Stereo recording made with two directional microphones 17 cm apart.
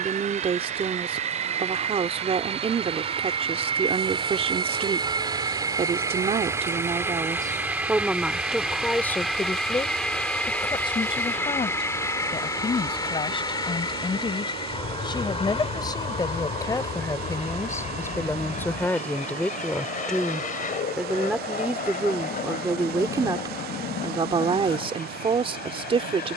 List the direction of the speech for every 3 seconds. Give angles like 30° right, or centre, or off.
40° right, 40° right, 20° right, 20° left, 30° left, 20° left, 10° left, 10° right, 30° right.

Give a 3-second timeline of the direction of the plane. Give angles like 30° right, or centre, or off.
40° right, 30° right, 10° right, 10° left, 20° left, 30° left, 40° left, 50° left, 50° left.